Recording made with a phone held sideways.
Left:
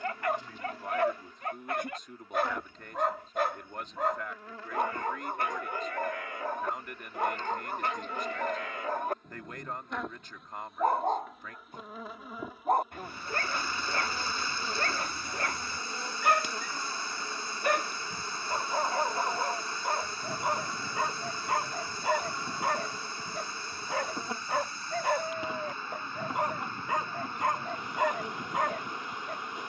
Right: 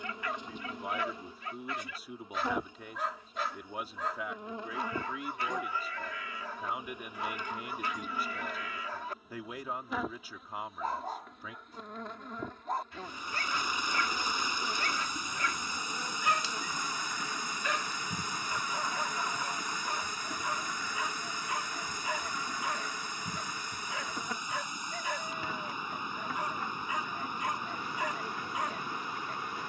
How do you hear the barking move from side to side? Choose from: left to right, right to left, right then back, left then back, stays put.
stays put.